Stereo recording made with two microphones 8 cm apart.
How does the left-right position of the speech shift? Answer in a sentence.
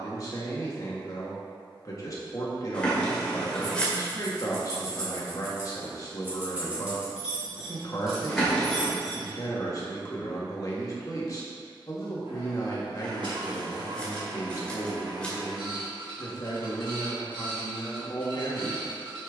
You can hear the speech stay in one place.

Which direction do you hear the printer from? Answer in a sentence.
In this clip you hear the printer on the right.